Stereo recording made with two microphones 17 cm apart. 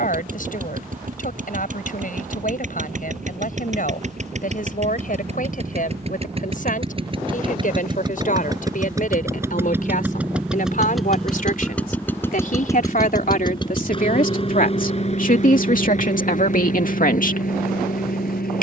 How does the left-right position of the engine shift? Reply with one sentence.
You can hear the engine move from right to left.